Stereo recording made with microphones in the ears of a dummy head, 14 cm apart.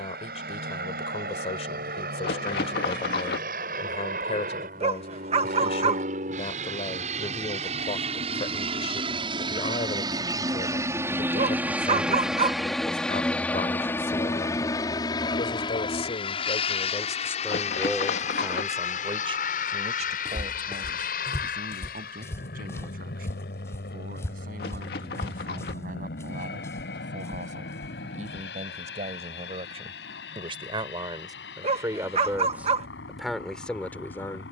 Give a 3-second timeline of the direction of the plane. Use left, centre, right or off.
right, right, right, right, centre, left, left, left, left, left, left, left.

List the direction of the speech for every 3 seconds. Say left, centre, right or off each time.
left, left, left, left, left, left, right, right, right, right, right, centre.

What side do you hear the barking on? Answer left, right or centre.
right.